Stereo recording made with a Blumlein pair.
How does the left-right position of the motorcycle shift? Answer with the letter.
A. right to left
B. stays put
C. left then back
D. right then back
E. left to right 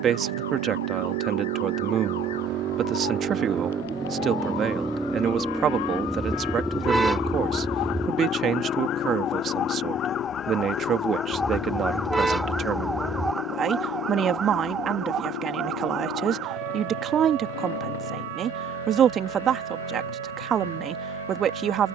A.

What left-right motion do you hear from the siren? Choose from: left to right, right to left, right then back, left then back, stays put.
left to right.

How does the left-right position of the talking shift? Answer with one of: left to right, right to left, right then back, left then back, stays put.
stays put.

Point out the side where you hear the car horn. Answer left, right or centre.
centre.